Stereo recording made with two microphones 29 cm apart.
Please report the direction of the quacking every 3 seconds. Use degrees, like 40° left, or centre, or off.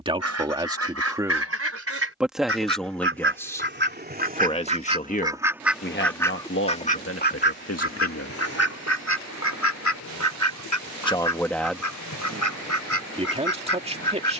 50° right, 20° right, 40° left, 70° left, 80° left.